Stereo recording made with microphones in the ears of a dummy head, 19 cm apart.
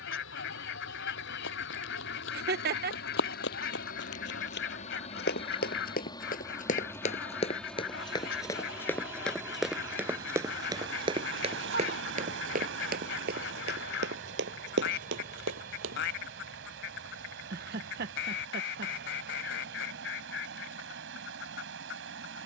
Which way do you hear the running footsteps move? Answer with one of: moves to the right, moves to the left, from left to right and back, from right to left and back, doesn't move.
moves to the right.